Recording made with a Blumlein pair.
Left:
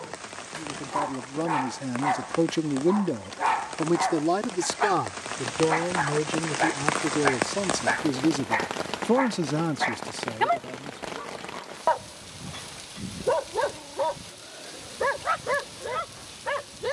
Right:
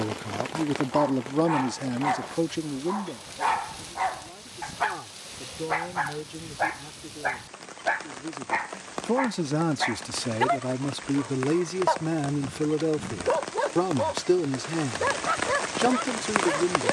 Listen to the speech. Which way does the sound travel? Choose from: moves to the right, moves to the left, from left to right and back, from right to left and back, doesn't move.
from right to left and back.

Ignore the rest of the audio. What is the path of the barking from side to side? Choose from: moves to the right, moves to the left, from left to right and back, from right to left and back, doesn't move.
doesn't move.